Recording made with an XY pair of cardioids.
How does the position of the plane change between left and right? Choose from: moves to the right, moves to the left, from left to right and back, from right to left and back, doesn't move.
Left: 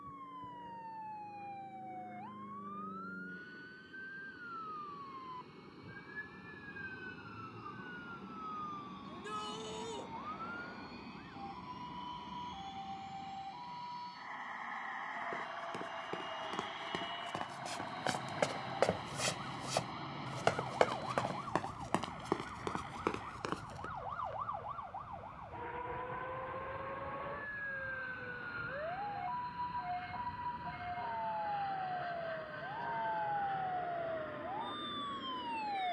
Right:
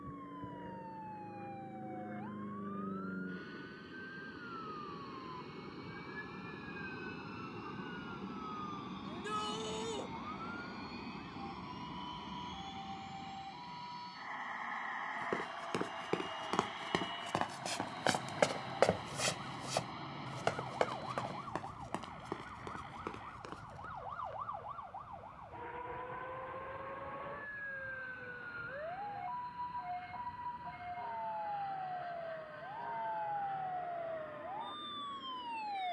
moves to the left.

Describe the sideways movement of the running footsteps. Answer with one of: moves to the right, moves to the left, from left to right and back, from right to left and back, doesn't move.
moves to the left.